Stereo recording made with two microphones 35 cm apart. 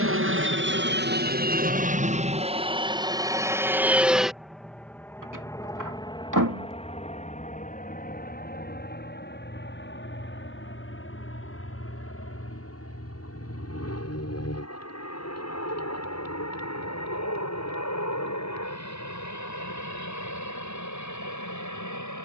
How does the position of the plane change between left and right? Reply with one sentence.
In this clip you hear the plane move to the left.